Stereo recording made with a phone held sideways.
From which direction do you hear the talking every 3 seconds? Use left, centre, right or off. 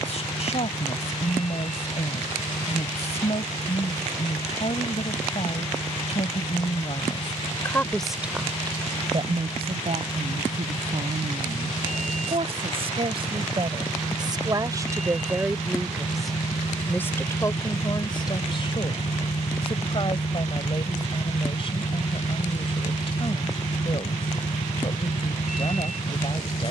left, left, left, right, right, centre, left, left, left.